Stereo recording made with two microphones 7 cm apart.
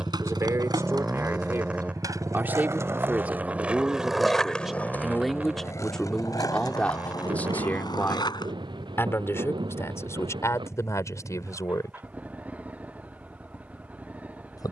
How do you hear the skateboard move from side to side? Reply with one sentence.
In this clip you hear the skateboard move to the left.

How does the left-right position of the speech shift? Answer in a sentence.
In this clip you hear the speech move to the left.